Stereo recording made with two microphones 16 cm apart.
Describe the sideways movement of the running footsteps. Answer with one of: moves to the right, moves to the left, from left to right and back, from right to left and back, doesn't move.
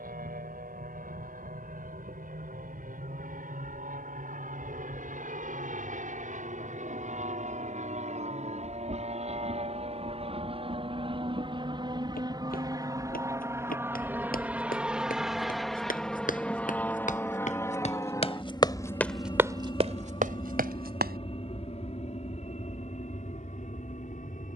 moves to the right.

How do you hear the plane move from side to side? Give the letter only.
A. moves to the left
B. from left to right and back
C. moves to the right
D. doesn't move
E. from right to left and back
A.